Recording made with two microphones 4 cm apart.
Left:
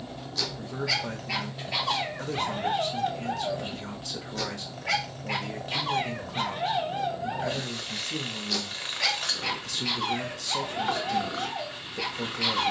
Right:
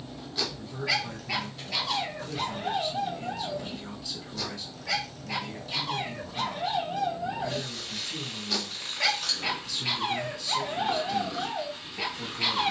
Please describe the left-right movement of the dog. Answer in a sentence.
In this clip you hear the dog move from right to left and back again.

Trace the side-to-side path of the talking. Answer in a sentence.
In this clip you hear the talking stay in one place.